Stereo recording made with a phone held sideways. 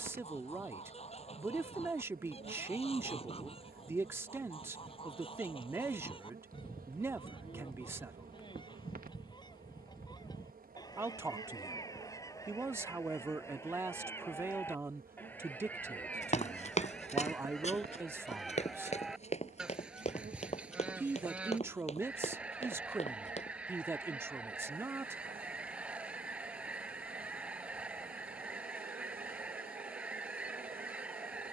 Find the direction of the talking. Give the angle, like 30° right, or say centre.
20° right.